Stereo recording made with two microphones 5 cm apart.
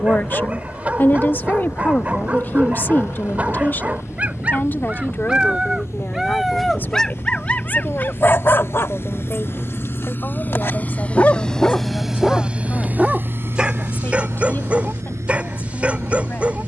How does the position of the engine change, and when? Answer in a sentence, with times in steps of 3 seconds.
You can hear the engine on the left from 0 s and on the right from 12 s.